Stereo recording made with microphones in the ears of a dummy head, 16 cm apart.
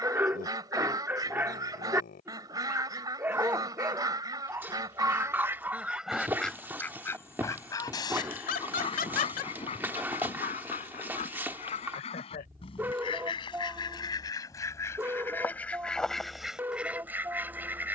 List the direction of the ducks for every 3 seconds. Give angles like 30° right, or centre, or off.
20° right, 20° right, 20° left, 40° left, 30° left, centre.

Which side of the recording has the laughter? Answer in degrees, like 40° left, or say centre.
50° left.